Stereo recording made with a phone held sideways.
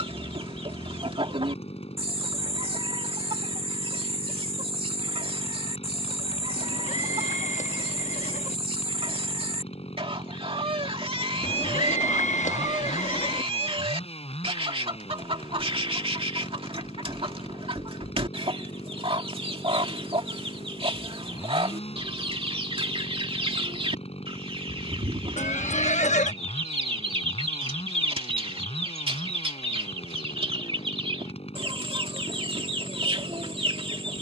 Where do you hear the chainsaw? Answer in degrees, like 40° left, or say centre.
50° left.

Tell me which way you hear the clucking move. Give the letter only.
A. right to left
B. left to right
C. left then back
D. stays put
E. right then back
D.